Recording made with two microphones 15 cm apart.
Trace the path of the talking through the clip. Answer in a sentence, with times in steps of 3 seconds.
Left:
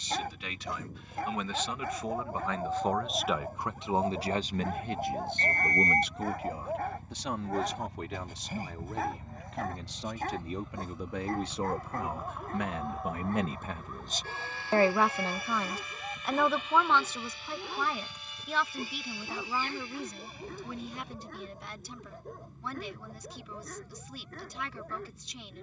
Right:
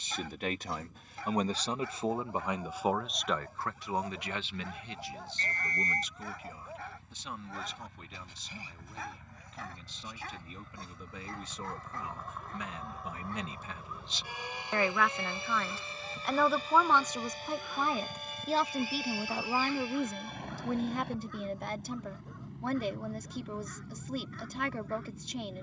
In this clip you hear the talking on the right from 0 s, on the left from 3 s, in the centre from 15 s and on the right from 18 s.